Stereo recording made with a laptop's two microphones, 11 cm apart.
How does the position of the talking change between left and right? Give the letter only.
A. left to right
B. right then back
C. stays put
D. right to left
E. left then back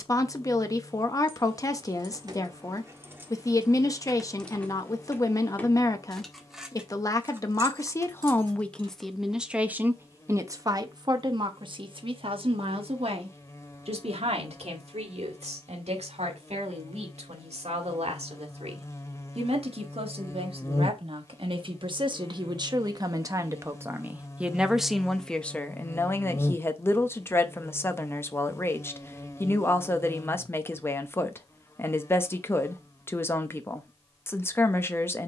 B.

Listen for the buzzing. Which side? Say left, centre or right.
left.